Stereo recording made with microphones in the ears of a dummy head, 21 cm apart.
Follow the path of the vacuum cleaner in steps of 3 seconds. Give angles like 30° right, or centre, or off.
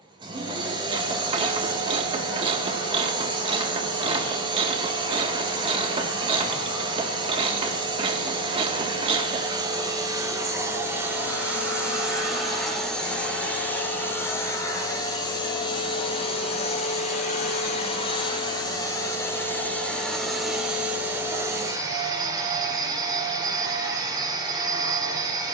20° right, 20° right, 20° right, 10° right, 10° left, 30° left, 10° left, 20° right, 20° right.